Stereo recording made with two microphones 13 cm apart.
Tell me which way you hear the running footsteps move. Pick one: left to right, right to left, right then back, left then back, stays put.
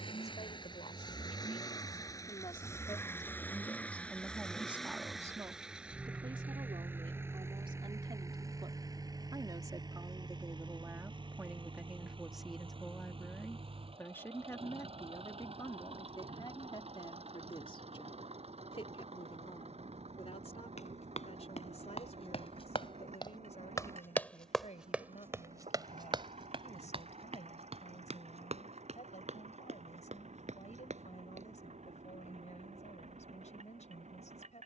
left to right.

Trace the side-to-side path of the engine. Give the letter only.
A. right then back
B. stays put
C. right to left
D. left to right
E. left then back
D.